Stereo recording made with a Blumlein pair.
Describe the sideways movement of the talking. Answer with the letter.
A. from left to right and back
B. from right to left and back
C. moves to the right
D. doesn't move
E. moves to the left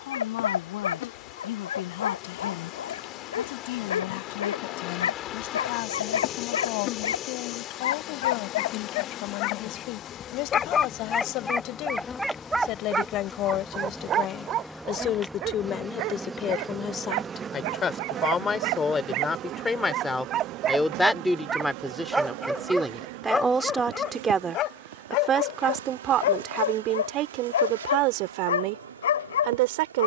C.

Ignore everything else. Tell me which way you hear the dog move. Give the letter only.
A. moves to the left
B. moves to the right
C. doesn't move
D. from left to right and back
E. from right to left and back
D.